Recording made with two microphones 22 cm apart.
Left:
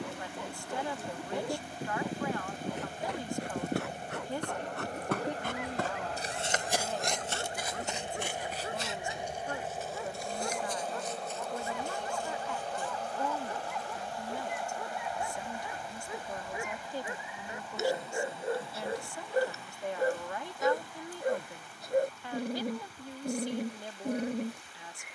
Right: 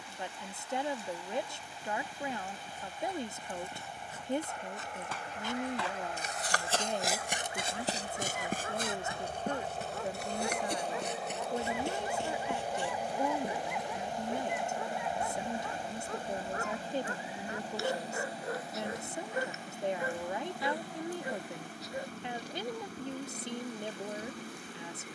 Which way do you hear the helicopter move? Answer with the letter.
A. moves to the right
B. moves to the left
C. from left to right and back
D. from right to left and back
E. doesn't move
A.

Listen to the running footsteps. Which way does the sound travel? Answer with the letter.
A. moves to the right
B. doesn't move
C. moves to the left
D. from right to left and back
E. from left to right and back
A.